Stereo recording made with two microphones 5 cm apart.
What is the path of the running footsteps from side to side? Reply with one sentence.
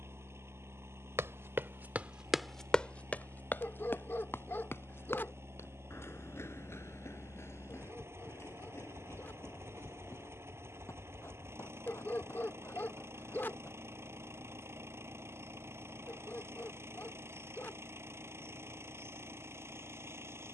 You can hear the running footsteps move from right to left.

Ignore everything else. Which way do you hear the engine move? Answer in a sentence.
In this clip you hear the engine stay in one place.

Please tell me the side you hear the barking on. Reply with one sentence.
In this clip you hear the barking on the left.